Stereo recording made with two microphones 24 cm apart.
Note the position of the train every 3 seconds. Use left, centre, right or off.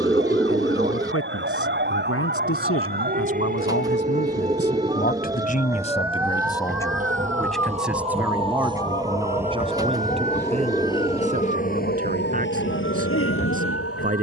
right, right, right, centre, left.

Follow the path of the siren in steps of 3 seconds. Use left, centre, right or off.
right, right, centre, left, left.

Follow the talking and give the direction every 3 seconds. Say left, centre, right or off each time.
left, left, centre, right, right.